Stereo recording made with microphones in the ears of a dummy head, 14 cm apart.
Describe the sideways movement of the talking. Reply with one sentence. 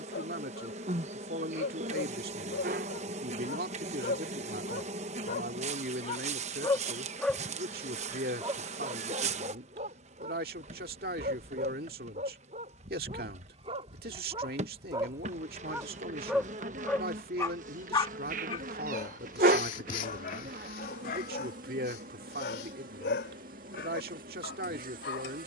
You can hear the talking stay put.